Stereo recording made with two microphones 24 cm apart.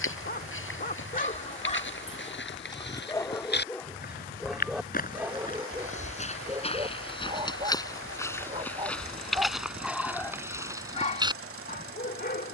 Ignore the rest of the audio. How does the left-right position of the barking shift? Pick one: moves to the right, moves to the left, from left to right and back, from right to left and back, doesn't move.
from left to right and back.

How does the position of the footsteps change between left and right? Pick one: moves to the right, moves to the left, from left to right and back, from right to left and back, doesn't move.
moves to the right.